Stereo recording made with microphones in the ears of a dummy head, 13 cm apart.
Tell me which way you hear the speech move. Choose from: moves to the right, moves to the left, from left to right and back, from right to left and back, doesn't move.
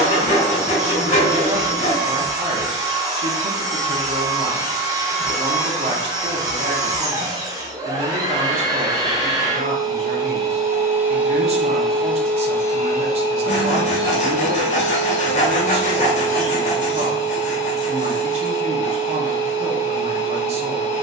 doesn't move.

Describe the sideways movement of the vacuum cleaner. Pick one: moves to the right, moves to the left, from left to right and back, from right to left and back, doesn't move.
moves to the left.